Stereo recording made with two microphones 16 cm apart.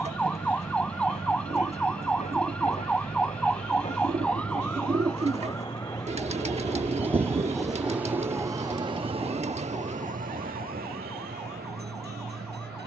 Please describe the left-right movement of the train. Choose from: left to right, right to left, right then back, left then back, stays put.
left to right.